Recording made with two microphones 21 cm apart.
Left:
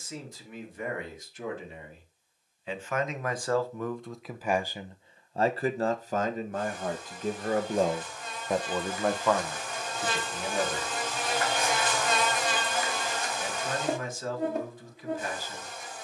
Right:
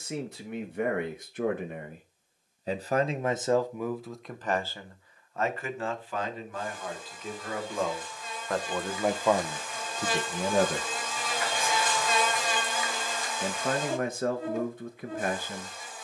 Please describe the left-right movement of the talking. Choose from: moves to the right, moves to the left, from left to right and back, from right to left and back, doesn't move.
from right to left and back.